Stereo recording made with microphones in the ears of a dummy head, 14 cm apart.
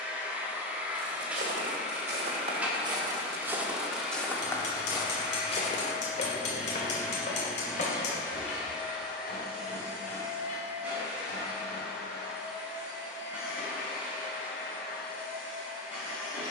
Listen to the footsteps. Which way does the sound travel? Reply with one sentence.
You can hear the footsteps go from the right side to the left.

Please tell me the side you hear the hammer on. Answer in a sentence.
In this clip you hear the hammer on the left.